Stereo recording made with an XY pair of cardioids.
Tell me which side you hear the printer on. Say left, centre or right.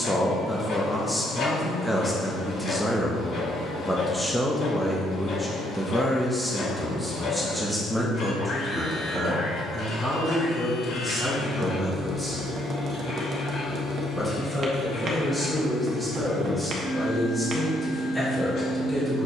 left.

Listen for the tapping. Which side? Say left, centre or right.
right.